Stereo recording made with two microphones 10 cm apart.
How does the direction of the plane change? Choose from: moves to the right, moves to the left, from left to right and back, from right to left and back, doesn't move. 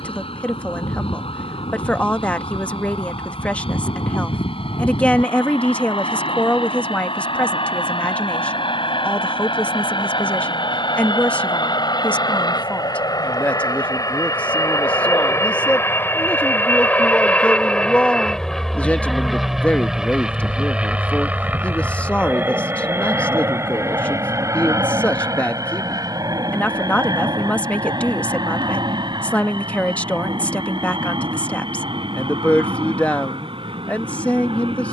moves to the right.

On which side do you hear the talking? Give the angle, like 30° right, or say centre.
10° left.